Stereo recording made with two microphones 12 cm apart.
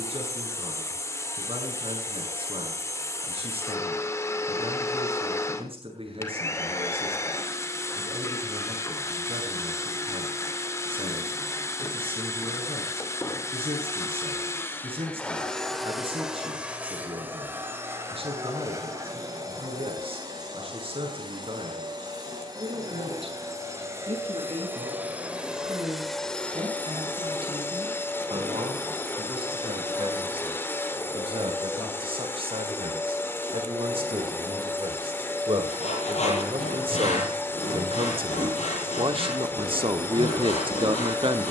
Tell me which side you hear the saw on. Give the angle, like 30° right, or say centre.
70° left.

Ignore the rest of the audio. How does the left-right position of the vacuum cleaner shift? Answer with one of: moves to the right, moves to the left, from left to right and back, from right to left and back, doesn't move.
from left to right and back.